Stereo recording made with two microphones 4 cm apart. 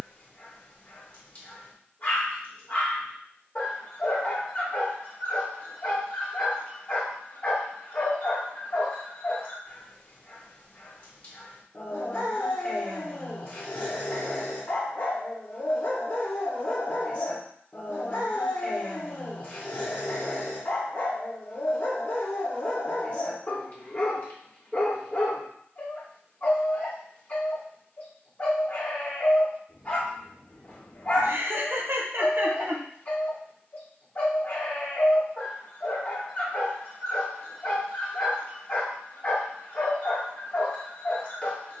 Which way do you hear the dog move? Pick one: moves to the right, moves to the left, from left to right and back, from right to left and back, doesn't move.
doesn't move.